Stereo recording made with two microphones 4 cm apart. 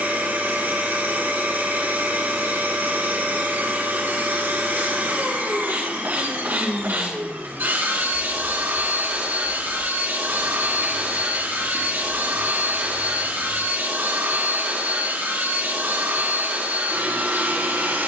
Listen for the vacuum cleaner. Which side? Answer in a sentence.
In this clip you hear the vacuum cleaner on the right.